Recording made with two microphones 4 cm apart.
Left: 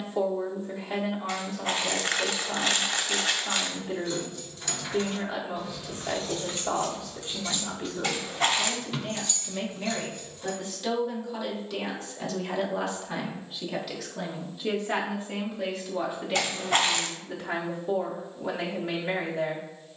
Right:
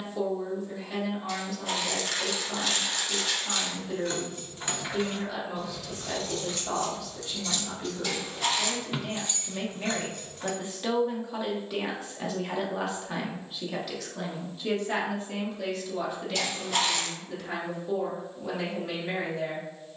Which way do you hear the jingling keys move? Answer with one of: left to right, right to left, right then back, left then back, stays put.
left then back.